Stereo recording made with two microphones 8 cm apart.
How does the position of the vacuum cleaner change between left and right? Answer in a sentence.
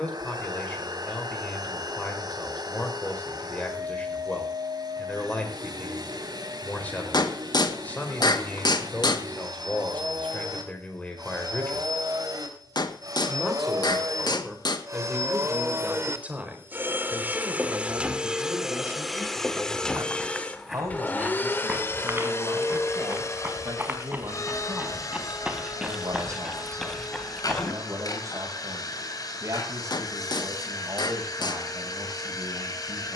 You can hear the vacuum cleaner move to the left.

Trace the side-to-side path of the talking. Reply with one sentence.
In this clip you hear the talking move from left to right.